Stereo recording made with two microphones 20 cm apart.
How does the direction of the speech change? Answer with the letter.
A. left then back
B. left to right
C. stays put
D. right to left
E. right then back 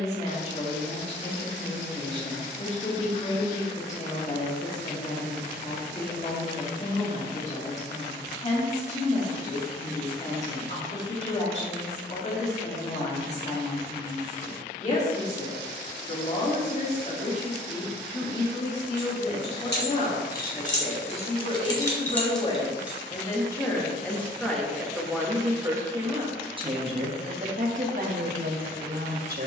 B.